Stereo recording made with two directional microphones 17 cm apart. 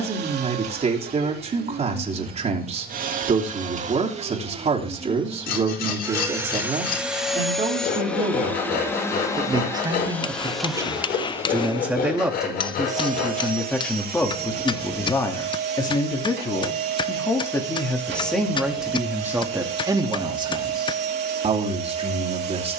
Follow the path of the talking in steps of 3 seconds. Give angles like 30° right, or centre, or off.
40° right, 40° right, 30° right, 20° right, centre, 20° left, 10° right, 30° right.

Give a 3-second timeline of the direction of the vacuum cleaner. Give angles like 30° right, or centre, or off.
60° right, 40° right, centre, centre, 60° right, 70° right, 70° right, 70° right.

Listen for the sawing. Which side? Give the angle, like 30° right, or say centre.
60° left.